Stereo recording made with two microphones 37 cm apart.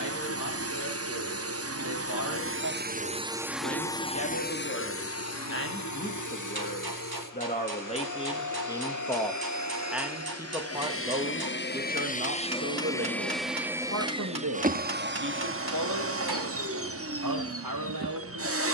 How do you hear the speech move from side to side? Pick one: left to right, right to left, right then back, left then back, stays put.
left to right.